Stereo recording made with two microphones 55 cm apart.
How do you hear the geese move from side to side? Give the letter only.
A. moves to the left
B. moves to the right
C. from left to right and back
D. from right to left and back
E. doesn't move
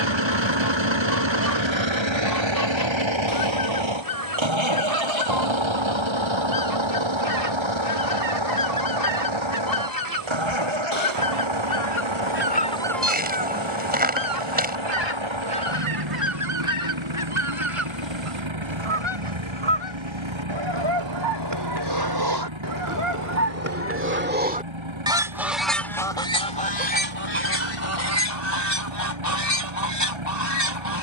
C.